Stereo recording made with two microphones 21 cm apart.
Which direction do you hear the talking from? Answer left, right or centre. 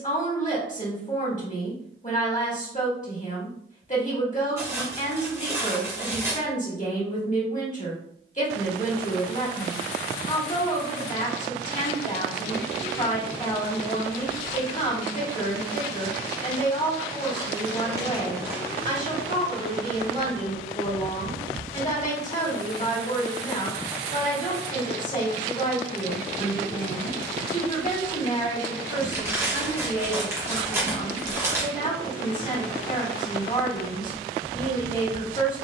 left.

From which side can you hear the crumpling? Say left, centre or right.
centre.